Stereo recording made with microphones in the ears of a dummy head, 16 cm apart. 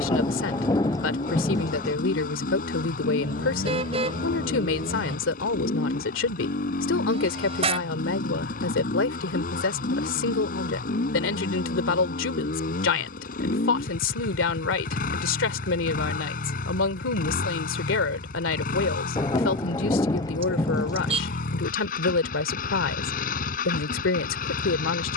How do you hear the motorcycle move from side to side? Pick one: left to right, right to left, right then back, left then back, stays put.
stays put.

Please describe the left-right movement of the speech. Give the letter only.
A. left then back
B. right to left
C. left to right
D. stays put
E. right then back
D.